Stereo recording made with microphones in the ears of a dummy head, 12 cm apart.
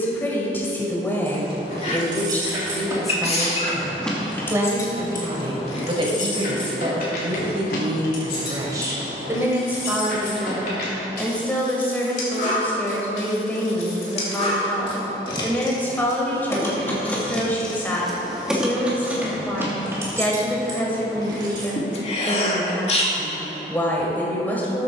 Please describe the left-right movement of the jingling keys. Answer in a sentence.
You can hear the jingling keys go left and come back.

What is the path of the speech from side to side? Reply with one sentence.
You can hear the speech move from left to right and back again.